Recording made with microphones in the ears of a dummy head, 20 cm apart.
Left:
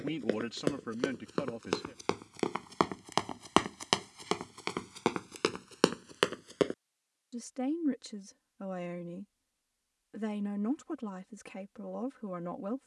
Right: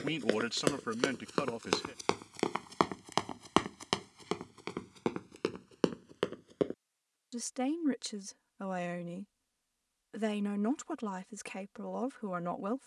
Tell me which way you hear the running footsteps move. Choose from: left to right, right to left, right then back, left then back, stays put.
right to left.